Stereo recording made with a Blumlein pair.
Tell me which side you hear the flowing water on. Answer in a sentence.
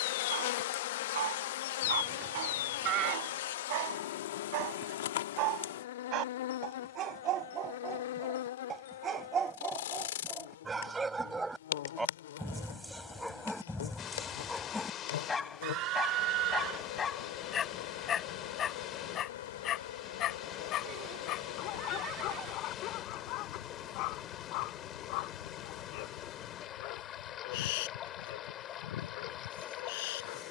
You can hear the flowing water on the left.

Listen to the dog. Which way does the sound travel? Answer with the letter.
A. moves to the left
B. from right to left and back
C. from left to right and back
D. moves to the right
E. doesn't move
A.